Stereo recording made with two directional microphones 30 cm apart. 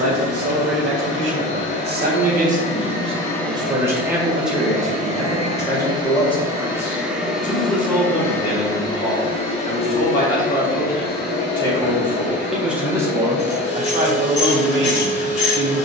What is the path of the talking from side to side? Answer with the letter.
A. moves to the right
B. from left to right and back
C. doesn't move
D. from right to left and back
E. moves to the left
D.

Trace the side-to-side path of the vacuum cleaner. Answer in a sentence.
In this clip you hear the vacuum cleaner go right and come back.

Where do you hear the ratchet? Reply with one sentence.
In this clip you hear the ratchet on the left.